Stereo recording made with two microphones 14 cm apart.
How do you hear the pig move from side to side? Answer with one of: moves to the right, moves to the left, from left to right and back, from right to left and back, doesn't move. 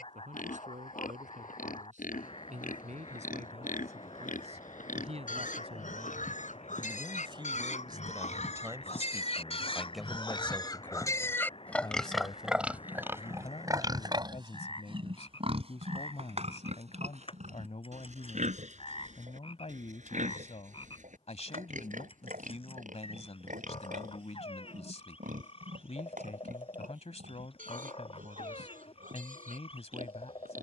moves to the right.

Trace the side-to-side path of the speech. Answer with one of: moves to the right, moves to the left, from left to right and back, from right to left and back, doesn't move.
moves to the left.